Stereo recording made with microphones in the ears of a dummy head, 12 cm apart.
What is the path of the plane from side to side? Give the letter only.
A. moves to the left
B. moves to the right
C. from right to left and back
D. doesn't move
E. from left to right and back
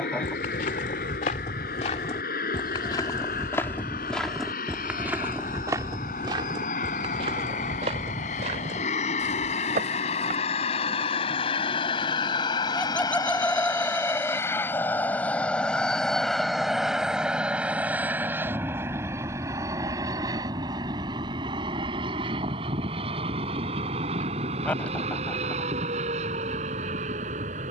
B.